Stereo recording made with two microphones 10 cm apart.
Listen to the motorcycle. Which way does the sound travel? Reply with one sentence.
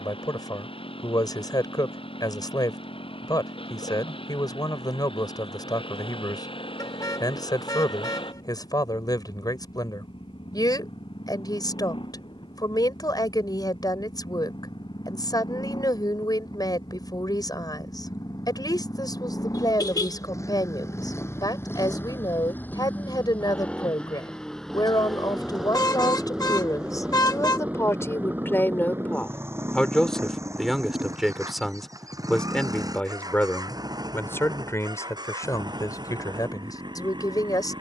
In this clip you hear the motorcycle move to the right.